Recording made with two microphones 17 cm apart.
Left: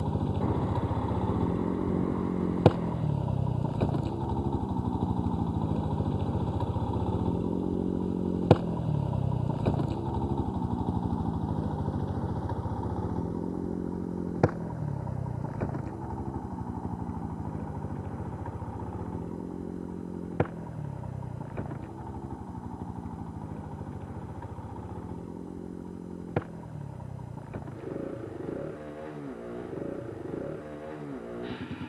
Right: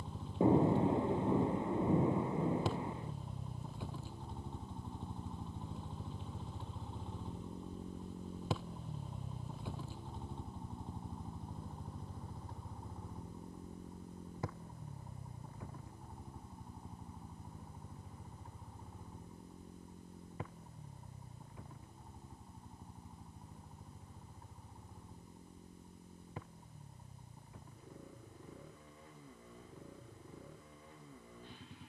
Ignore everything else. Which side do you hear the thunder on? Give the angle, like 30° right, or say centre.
20° right.